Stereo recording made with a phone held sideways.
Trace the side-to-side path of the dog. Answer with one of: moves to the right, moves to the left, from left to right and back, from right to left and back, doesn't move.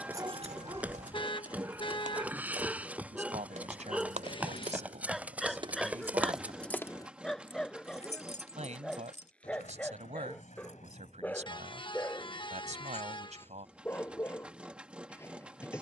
moves to the left.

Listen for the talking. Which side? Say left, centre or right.
right.